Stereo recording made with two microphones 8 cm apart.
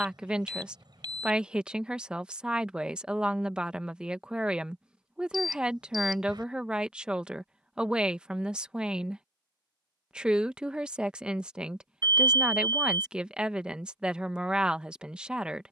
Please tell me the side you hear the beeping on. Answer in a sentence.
You can hear the beeping on the right.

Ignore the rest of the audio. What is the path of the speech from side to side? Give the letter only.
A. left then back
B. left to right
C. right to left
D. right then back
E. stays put
E.